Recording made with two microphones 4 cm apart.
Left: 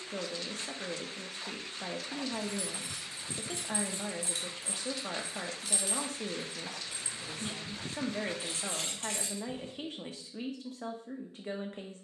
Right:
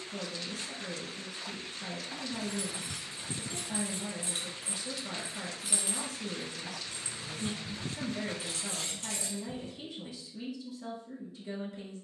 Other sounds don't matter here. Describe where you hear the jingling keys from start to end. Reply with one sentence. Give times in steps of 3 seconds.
In this clip you hear the jingling keys on the right from 0 s and on the left from 6 s.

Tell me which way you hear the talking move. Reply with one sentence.
You can hear the talking stay in one place.